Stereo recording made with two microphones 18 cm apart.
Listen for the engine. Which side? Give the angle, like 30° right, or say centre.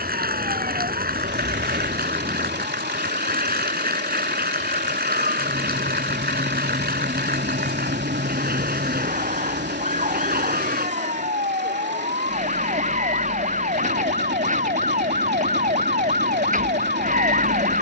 70° right.